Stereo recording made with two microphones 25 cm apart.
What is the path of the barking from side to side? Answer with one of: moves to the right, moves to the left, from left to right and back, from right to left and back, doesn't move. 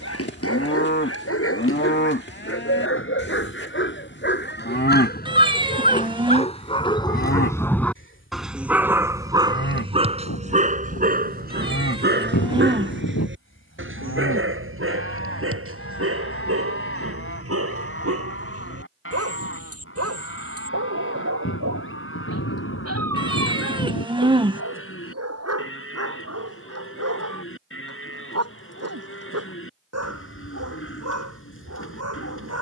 moves to the right.